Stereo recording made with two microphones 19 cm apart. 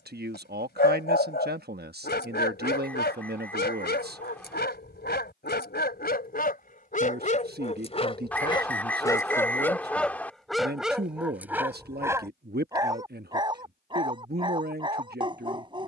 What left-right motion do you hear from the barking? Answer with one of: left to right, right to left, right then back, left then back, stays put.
left to right.